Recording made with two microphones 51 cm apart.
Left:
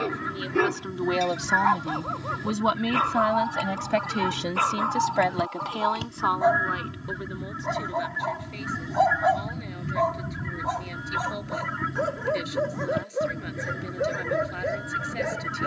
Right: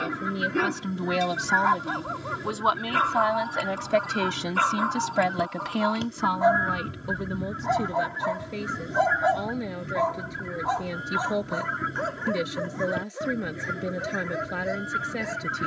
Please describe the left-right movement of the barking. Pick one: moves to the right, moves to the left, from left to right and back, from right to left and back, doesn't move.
moves to the left.